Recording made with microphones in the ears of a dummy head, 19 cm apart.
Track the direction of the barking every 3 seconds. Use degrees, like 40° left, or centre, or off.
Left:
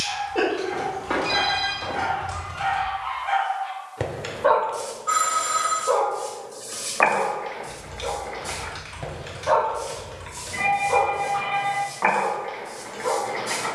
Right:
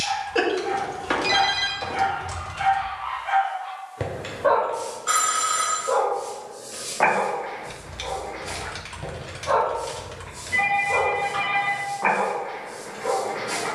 20° right, 20° left, 50° left, 60° left, 60° left.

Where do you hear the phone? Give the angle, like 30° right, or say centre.
60° right.